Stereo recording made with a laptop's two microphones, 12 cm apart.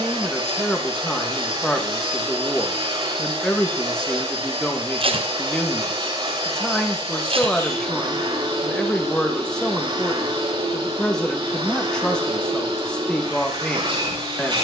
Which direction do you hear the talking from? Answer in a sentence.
You can hear the talking in the centre.